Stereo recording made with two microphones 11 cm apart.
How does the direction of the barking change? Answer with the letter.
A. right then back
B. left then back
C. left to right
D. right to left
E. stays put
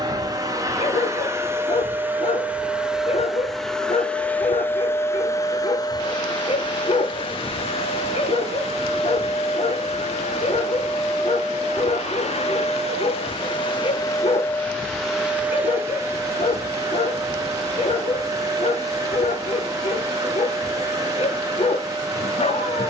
E.